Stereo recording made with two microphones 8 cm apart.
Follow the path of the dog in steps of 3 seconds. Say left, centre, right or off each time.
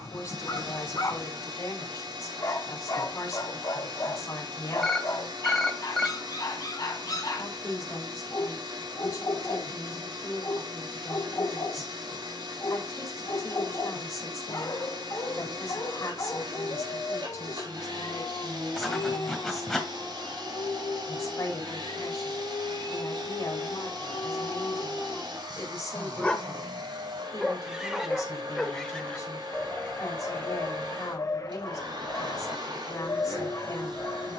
left, left, left, left, left, left, left, left, left, centre, left, left.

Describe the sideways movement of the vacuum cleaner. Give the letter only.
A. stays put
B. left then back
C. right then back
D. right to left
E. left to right
A.